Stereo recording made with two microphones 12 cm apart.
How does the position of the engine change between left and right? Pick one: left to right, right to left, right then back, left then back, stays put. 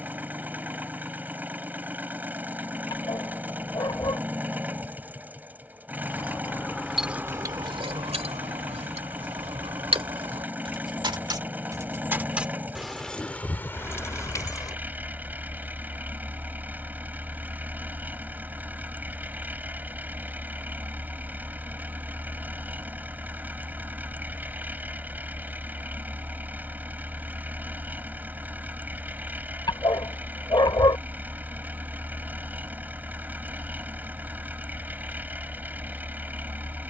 stays put.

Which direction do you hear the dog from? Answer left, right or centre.
left.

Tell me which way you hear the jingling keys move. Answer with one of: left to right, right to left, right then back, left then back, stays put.
right then back.